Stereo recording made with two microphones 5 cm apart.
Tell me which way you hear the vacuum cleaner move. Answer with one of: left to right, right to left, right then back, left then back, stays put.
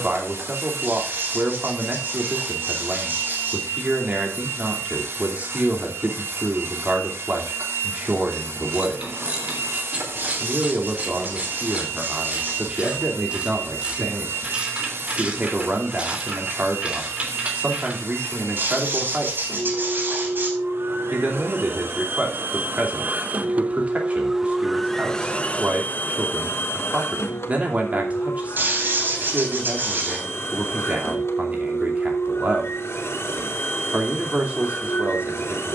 right to left.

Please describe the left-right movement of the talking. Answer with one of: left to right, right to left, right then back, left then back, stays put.
stays put.